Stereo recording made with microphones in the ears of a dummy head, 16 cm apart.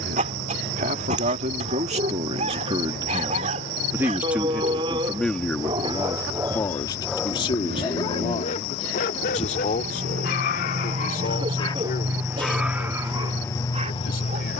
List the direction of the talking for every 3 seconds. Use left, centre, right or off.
right, centre, left, left, left.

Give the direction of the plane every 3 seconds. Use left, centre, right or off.
right, right, right, right, centre.